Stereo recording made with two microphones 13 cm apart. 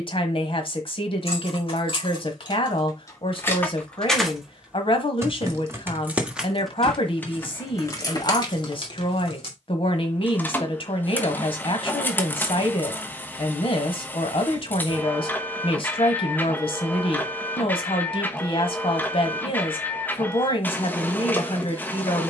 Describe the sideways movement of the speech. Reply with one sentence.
In this clip you hear the speech stay put.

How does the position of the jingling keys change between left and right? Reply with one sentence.
You can hear the jingling keys go right and come back.